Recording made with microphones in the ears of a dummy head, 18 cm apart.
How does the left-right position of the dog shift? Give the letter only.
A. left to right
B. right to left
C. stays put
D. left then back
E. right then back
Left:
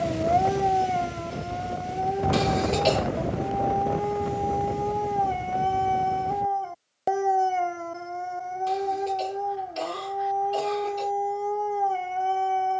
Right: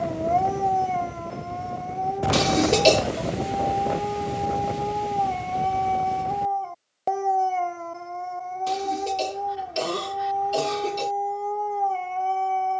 C.